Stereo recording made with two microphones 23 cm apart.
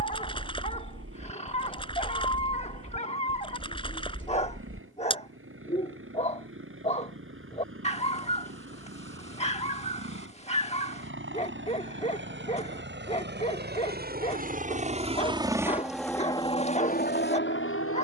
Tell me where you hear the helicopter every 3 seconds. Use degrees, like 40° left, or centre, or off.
70° right, 70° right, 70° right, 60° right, 50° right, 20° left.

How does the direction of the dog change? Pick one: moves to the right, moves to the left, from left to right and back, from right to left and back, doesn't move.
doesn't move.